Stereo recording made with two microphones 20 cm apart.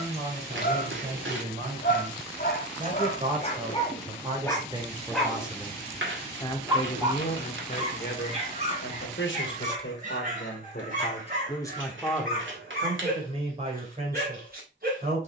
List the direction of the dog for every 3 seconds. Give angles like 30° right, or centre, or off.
50° left, 10° left, 30° right, 40° right, 50° right.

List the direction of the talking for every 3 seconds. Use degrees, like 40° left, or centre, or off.
40° right, 20° right, 40° left, 50° left, 30° right.